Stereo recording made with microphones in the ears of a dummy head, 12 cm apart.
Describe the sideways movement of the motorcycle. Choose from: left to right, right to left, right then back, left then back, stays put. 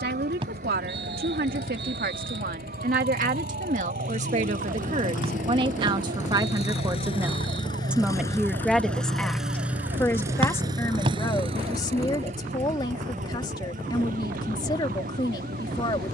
left to right.